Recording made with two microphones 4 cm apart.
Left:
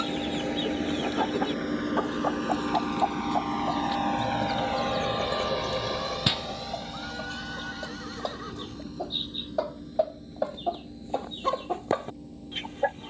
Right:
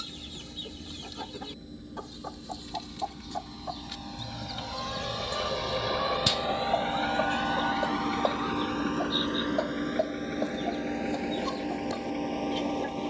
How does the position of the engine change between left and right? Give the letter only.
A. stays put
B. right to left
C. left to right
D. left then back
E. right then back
C.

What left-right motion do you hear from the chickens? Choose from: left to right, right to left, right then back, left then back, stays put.
right then back.